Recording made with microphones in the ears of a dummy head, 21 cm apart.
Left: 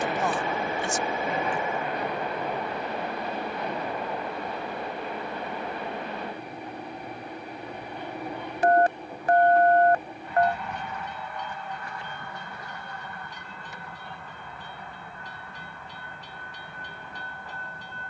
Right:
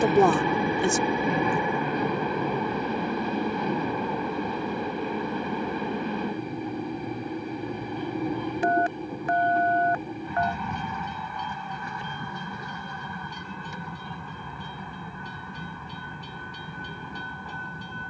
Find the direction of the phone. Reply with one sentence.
In this clip you hear the phone on the left.